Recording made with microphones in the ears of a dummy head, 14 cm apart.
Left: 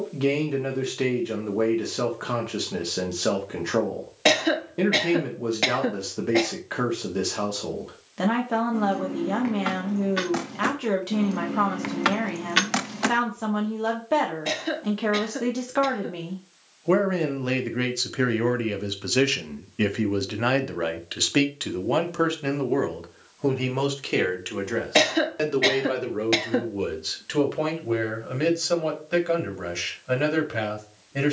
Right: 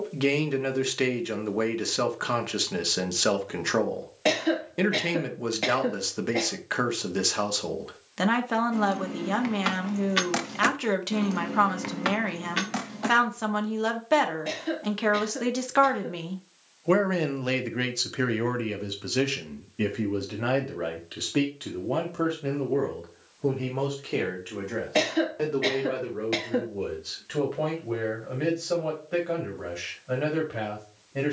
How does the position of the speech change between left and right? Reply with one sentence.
In this clip you hear the speech move to the left.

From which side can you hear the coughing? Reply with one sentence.
You can hear the coughing on the left.